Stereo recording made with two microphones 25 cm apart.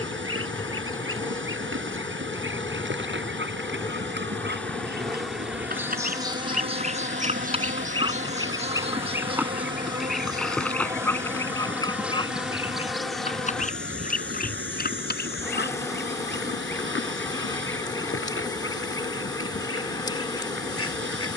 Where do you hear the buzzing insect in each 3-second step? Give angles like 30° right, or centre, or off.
20° left, 10° left, 30° right, 10° right, centre, 10° left, 20° left.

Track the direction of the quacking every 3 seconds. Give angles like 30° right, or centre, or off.
50° right, 40° right, 20° right, centre, 30° left, 50° left, 60° left.